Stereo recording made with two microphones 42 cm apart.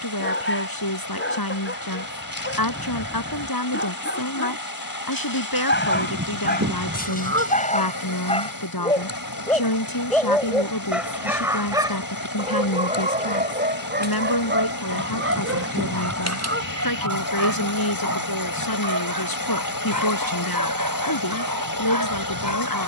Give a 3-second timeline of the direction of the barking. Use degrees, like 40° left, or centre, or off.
30° left, 30° left, 20° left, centre, 20° right, 40° right, 50° right, 50° right.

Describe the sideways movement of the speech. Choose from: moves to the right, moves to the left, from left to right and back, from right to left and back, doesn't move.
doesn't move.